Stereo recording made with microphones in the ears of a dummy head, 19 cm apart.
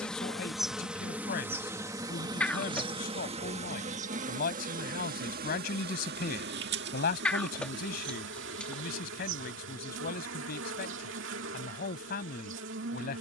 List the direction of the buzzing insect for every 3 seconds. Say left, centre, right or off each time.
centre, right, right, right, right.